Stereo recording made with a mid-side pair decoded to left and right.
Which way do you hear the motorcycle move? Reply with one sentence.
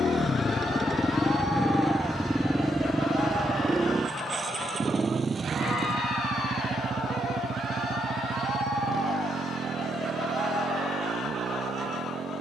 In this clip you hear the motorcycle travel towards the right.